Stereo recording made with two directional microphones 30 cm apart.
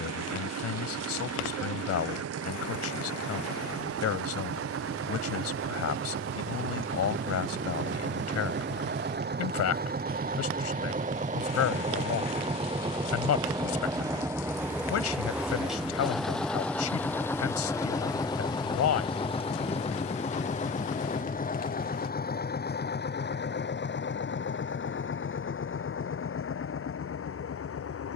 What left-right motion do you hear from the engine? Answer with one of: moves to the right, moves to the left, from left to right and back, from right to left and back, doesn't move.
moves to the left.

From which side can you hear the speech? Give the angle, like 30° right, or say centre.
60° left.